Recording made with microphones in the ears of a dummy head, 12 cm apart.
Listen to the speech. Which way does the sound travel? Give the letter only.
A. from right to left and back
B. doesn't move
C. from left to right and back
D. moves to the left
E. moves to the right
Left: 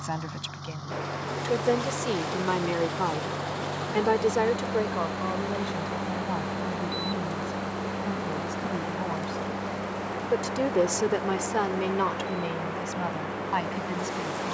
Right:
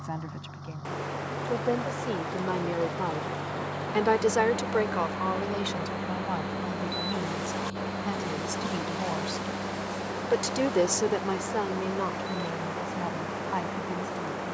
C.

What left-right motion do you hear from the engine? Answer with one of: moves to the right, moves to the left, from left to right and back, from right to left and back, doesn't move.
moves to the right.